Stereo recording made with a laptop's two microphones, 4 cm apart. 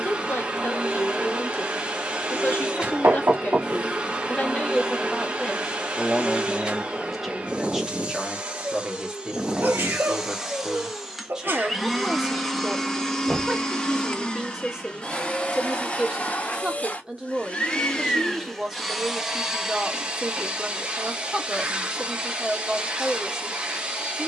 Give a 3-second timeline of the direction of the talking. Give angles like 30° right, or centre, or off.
60° left, 30° left, centre, 10° right, 10° right, 10° right, 10° right, 10° right.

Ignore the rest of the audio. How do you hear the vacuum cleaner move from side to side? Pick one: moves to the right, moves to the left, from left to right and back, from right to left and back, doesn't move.
from right to left and back.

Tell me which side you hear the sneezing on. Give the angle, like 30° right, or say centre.
60° right.